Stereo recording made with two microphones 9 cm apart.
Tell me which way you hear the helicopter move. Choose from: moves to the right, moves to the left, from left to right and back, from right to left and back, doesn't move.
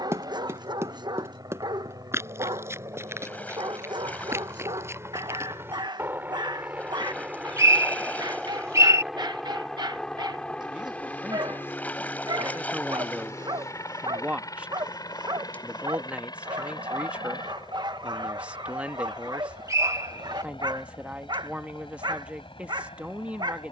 moves to the left.